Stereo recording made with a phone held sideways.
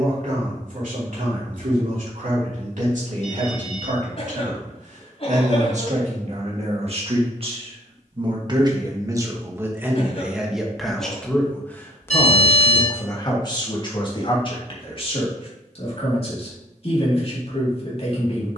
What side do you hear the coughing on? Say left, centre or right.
left.